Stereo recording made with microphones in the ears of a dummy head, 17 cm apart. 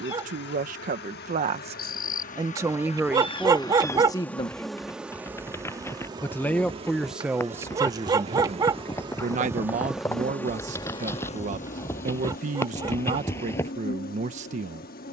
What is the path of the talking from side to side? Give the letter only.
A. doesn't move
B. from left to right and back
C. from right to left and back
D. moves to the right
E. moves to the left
C.